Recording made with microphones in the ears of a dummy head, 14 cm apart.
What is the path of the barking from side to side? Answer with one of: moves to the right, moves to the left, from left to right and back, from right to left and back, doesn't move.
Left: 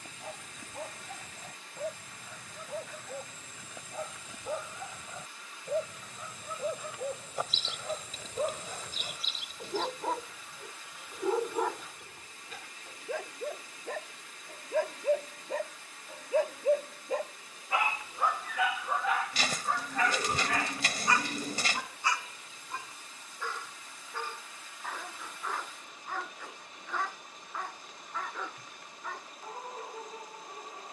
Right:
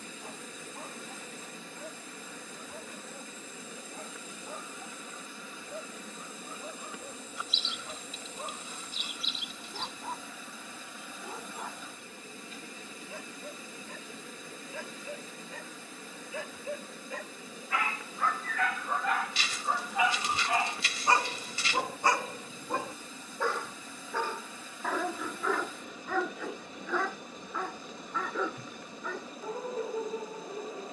moves to the right.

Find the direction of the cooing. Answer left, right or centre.
left.